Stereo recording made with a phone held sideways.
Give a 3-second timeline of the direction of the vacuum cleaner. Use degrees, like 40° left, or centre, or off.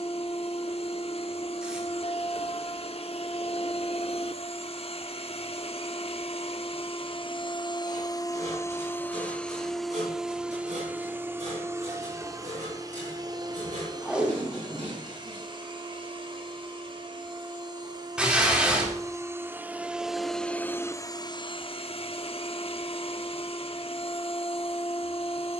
50° left, 50° left, 40° left, 10° right, 30° right, 40° right, 10° right, 50° left, 50° left.